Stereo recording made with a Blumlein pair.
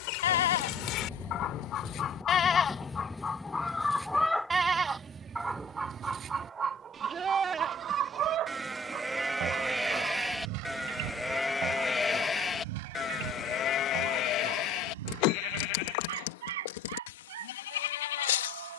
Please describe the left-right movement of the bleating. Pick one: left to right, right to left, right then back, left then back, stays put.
right then back.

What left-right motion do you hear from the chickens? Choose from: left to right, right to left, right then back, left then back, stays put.
left to right.